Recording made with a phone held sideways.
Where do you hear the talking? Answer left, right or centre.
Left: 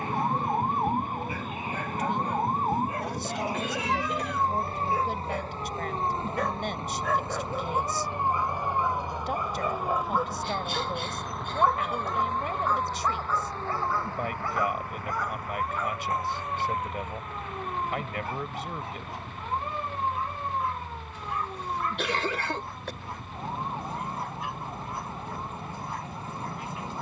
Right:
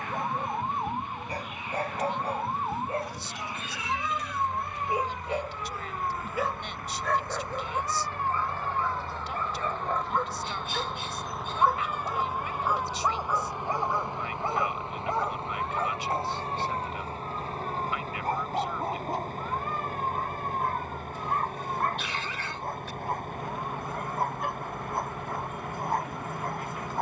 left.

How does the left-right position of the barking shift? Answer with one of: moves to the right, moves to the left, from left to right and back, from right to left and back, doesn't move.
from right to left and back.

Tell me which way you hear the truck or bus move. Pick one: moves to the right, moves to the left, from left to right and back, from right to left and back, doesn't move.
moves to the right.